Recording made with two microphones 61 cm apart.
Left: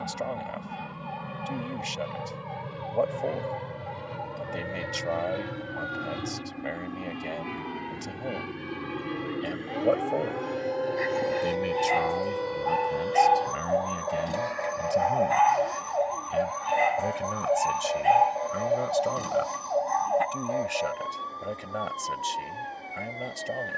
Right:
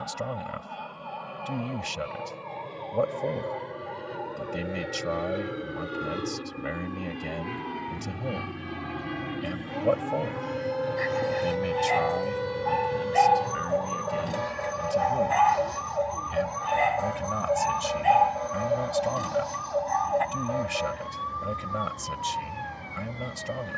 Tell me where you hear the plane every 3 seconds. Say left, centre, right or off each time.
left, left, centre, right, right, right, right, right.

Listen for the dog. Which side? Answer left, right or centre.
centre.